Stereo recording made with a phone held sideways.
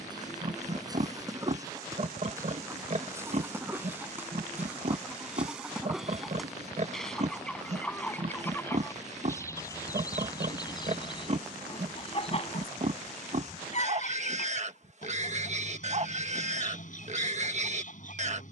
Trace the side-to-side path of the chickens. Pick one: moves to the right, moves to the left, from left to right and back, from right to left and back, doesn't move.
moves to the left.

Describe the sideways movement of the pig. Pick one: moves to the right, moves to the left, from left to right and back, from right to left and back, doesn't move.
doesn't move.